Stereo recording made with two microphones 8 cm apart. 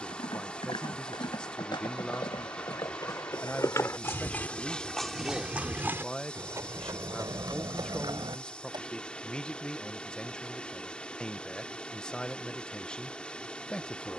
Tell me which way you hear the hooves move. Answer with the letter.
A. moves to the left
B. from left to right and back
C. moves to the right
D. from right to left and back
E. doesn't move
C.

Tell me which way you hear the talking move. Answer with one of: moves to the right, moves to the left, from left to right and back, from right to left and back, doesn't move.
doesn't move.